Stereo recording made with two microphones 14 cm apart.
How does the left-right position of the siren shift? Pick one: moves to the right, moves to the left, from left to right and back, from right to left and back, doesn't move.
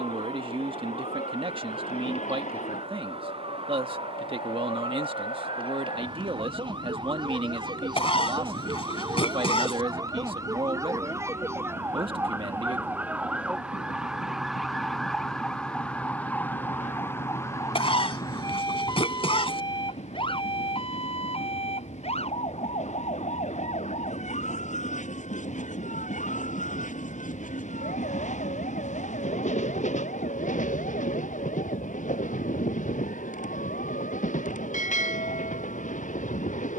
moves to the left.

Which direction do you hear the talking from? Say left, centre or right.
right.